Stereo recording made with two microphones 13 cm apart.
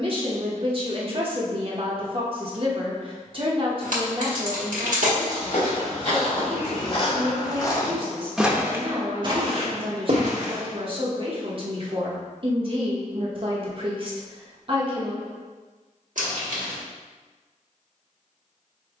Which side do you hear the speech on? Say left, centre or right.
right.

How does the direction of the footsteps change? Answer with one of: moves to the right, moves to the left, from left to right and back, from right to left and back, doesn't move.
moves to the right.